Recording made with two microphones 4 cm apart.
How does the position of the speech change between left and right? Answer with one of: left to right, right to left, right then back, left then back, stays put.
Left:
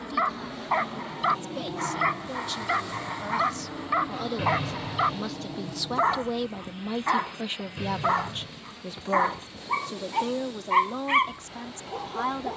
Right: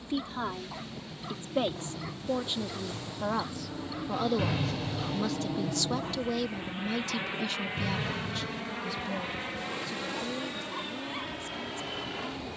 right to left.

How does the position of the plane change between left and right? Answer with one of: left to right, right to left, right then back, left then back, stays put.
left to right.